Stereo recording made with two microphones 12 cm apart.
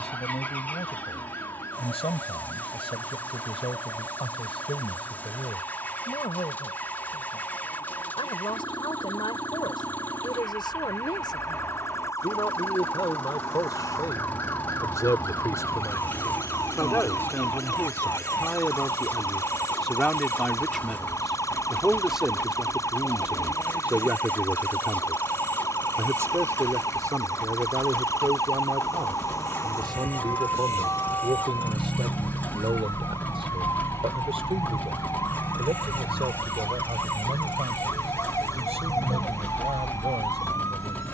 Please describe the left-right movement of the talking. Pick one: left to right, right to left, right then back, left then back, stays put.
left to right.